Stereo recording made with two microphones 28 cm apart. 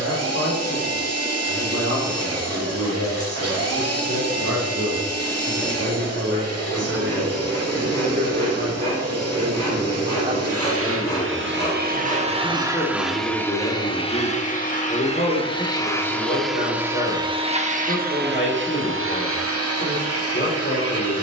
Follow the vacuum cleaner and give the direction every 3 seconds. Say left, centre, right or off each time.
right, right, right, right, centre, centre, right.